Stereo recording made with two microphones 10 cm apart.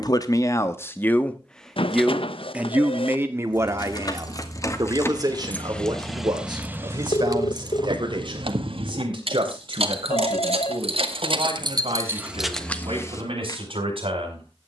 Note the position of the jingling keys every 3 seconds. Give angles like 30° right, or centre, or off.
off, 30° left, 40° right, 70° right, 10° left.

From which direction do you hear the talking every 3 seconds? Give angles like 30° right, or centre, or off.
10° left, 30° right, 50° right, 50° right, 60° right.